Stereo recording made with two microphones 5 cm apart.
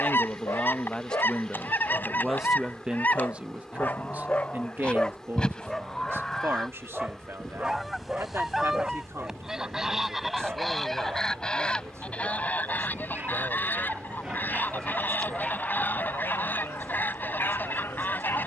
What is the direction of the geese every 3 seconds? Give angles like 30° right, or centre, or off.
40° left, 20° left, centre, centre, 40° left, 40° left.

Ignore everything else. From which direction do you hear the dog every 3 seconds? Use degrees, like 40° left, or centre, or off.
70° left, 30° left, 10° right, 40° right, 30° right, 40° left.